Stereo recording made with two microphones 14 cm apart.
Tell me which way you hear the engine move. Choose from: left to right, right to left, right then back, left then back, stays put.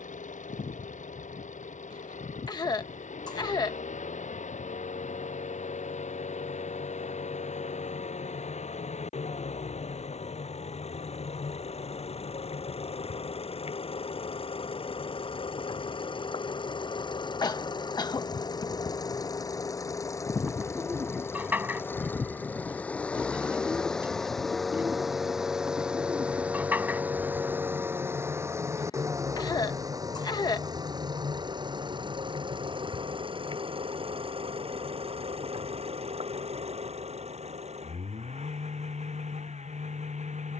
left to right.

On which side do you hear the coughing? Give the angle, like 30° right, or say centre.
30° left.